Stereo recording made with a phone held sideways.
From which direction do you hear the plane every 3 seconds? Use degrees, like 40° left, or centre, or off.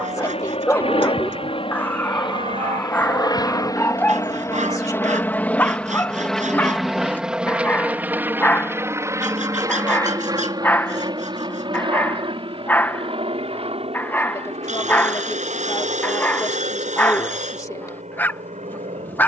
50° left, 20° left, 10° right, 30° right, 40° right, 50° right, 50° right.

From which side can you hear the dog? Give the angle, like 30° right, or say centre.
10° left.